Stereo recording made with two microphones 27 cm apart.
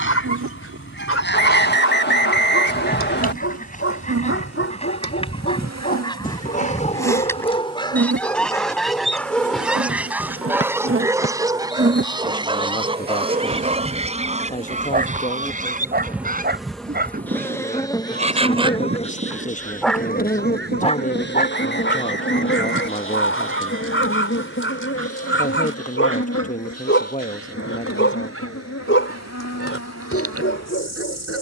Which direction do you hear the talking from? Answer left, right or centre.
left.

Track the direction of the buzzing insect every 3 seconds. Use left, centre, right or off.
right, right, right, right, right, centre, left, left, left, left, left.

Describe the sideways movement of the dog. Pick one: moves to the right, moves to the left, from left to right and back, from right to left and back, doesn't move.
from left to right and back.